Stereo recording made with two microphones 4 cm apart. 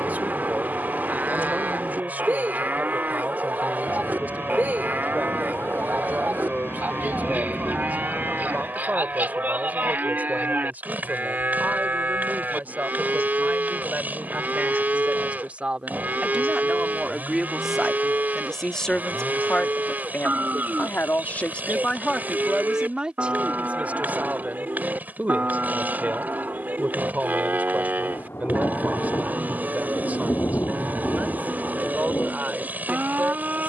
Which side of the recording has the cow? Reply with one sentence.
You can hear the cow on the right.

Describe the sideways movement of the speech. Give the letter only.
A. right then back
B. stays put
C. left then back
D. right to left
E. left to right
C.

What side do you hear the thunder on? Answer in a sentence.
In this clip you hear the thunder on the left.